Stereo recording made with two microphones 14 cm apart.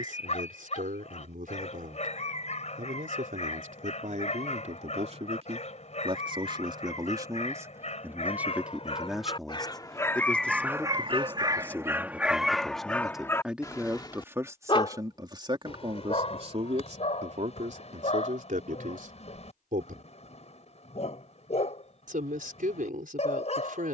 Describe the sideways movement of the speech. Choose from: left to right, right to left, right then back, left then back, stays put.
left then back.